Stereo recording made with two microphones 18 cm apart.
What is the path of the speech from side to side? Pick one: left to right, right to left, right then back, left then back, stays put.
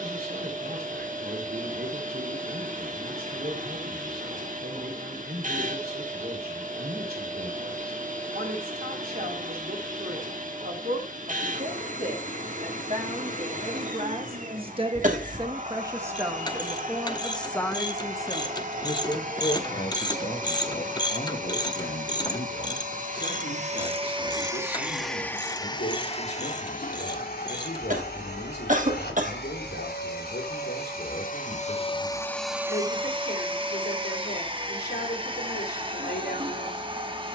right to left.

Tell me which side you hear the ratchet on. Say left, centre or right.
left.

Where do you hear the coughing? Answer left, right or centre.
right.